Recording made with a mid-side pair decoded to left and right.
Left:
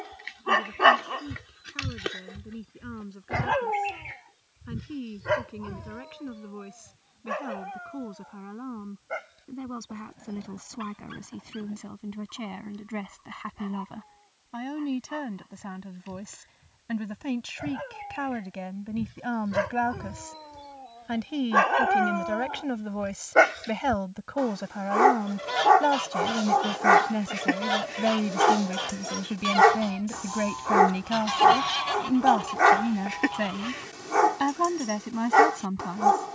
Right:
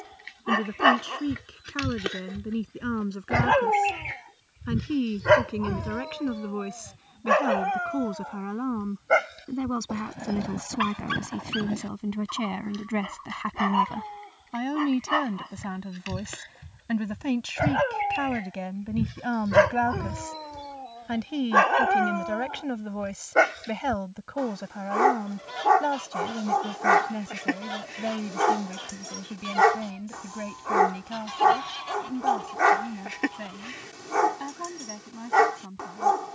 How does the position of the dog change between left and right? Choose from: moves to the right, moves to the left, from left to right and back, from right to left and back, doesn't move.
from left to right and back.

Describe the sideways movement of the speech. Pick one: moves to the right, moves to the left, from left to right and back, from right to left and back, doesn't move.
moves to the left.